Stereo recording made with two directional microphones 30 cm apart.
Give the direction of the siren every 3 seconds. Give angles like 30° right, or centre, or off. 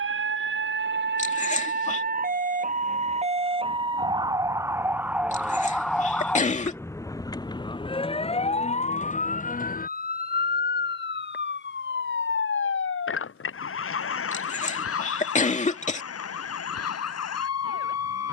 30° right, 10° right, 10° left, 30° left, 40° left, 50° left.